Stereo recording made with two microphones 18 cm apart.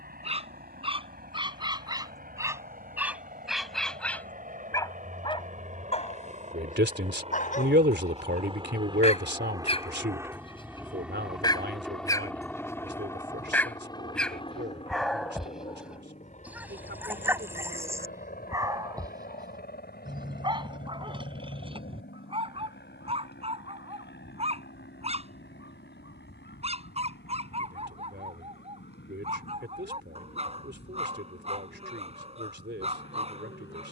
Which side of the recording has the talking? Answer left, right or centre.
right.